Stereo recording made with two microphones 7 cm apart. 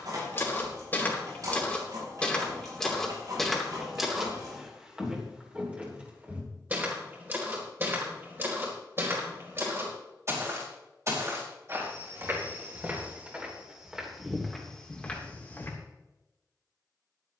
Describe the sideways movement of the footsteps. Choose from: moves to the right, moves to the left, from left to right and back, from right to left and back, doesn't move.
from left to right and back.